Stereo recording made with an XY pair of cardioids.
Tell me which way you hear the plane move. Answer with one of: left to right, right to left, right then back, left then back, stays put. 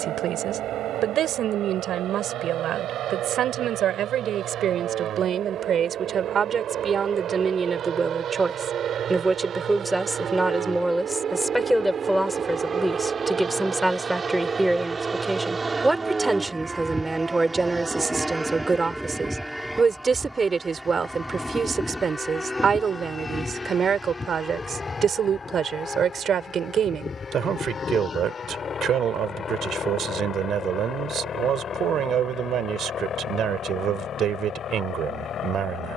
right to left.